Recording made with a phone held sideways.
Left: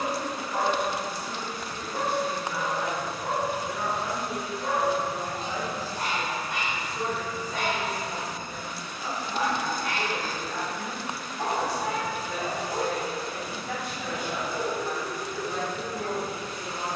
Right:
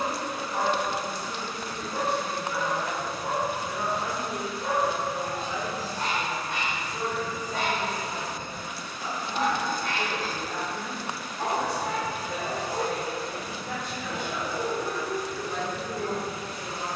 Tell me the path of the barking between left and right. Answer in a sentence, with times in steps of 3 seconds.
In this clip you hear the barking on the right from 0 s and in the centre from 3 s.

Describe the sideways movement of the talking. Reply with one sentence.
You can hear the talking go right and come back.